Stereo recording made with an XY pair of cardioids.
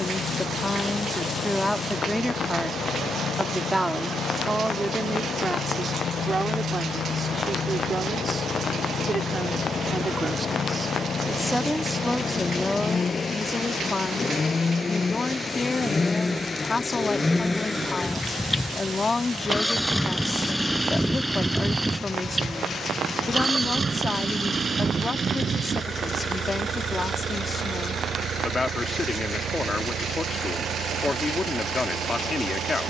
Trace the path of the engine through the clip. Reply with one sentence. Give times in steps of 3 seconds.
You can hear the engine on the left from 0 s, in the centre from 18 s and on the right from 24 s.